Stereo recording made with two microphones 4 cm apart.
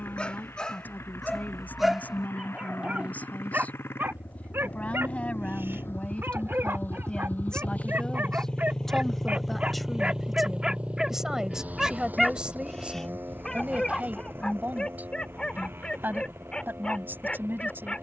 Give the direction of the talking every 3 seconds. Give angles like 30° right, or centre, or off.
40° left, 30° left, 20° left, 10° right, 30° right, 60° right.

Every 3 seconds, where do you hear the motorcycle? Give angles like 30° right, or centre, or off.
80° left, 70° left, 40° left, 20° right, 60° right, 70° right.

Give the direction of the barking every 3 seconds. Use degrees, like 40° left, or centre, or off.
centre, 60° right, 60° right, 20° right, 10° left, 20° left.